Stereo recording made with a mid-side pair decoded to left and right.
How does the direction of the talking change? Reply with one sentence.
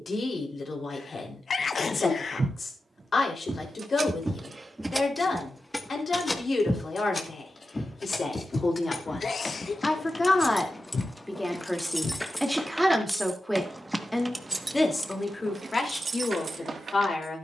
You can hear the talking go right and come back.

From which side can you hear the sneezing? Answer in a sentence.
In this clip you hear the sneezing on the left.